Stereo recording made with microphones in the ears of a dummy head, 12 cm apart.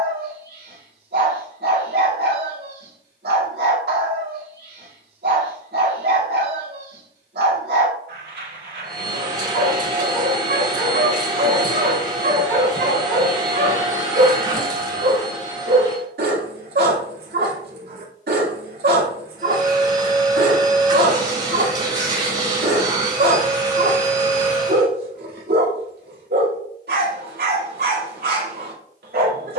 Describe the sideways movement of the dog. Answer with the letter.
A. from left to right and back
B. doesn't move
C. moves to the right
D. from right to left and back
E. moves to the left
B.